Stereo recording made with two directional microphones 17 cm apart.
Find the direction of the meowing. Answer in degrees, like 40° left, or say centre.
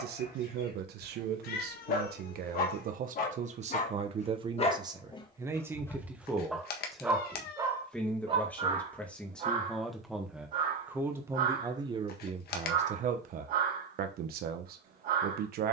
60° left.